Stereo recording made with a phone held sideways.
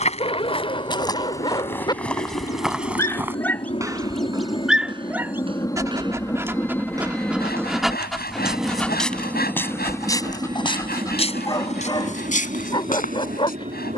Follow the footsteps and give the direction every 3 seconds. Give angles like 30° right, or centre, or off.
20° left, 30° right, 10° right, 30° left, 60° left.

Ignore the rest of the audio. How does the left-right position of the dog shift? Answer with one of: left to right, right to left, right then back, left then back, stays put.
right then back.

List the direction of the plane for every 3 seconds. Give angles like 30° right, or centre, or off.
50° left, 30° left, centre, 20° right, 40° right.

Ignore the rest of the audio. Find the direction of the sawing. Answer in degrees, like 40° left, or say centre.
70° left.